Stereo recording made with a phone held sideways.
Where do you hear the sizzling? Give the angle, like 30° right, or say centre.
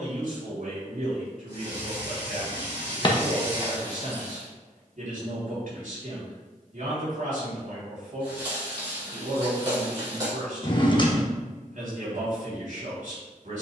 30° right.